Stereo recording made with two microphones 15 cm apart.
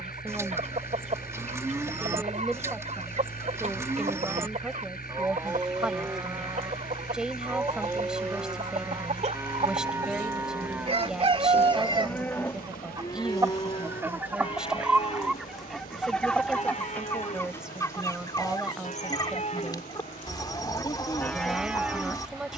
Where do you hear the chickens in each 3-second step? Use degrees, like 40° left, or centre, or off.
60° right, 60° right, 60° right, 40° right, 20° right, 10° left, 30° left, 30° left.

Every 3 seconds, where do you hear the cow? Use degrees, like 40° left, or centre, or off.
20° right, 20° right, 20° right, 10° right, 30° left, 50° left, 50° left, centre.